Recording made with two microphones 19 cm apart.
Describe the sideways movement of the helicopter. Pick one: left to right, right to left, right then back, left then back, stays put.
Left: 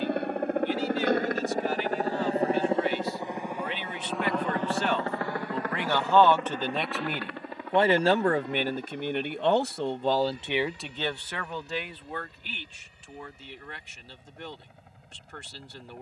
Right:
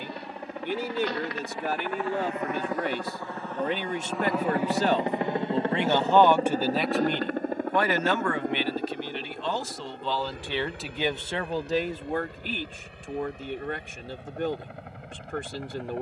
left to right.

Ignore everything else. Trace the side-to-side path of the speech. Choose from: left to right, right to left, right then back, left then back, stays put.
left then back.